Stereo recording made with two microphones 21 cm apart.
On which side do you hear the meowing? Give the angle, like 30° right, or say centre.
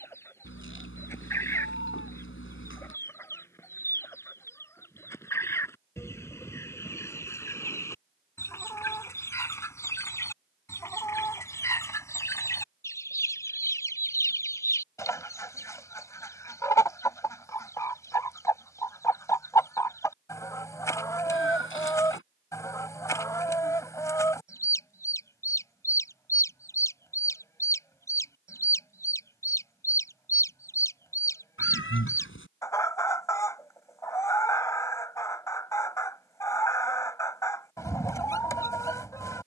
70° left.